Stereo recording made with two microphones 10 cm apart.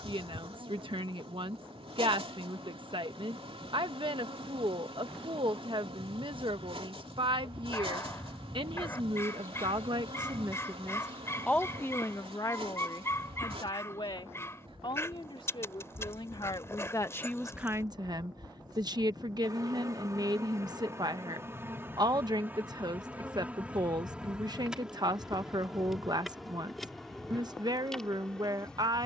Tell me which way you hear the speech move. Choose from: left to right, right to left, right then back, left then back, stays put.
left then back.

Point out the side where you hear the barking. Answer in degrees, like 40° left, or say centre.
30° left.